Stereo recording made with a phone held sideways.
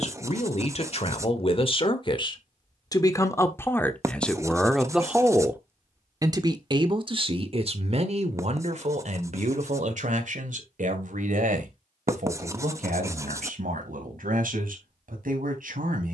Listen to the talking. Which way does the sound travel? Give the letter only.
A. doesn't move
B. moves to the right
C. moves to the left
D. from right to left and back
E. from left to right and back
B.